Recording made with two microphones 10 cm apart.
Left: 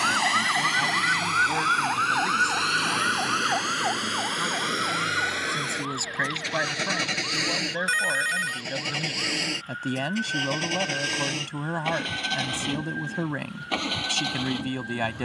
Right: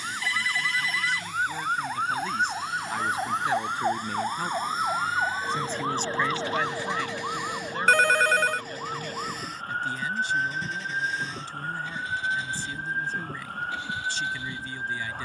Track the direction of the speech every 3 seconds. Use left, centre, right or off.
left, centre, left, left, left.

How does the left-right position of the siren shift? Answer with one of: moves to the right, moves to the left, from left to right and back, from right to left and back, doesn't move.
moves to the right.